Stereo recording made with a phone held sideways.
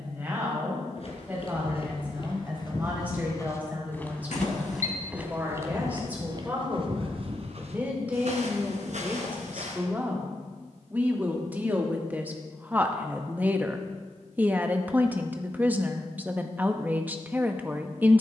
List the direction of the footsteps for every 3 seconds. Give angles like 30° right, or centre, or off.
40° left, centre, 50° right, 70° right, off, off.